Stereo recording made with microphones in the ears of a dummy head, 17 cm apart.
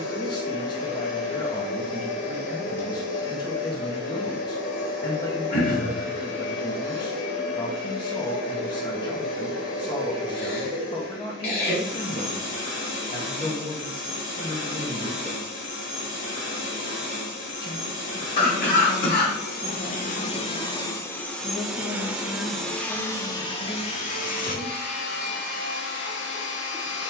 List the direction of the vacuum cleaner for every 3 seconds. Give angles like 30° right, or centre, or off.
70° left, 70° left, 70° left, 70° left, 70° left, 70° left, 50° left, 10° left, 60° left.